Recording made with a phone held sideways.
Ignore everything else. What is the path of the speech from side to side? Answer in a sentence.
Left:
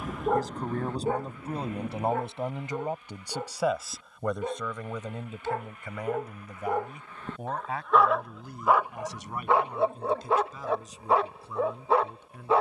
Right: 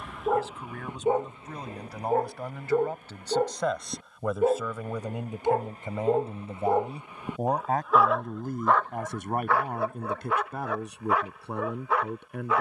You can hear the speech move to the right.